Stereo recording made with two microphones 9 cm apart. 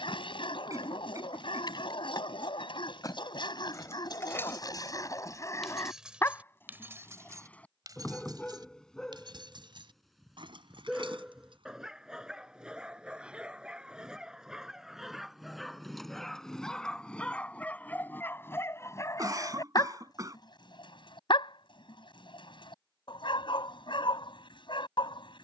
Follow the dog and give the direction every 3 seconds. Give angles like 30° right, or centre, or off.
70° left, 50° left, 20° left, centre, 10° right, 10° left, 40° left, 60° left, 60° left.